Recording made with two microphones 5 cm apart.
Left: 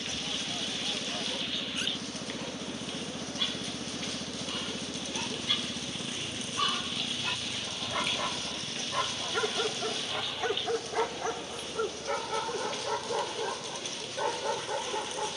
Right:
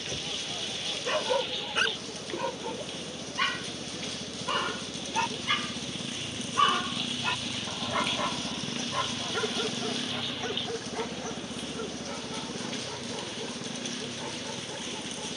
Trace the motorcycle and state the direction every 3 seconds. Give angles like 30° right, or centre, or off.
50° left, 20° left, 10° right, 40° right, 60° right.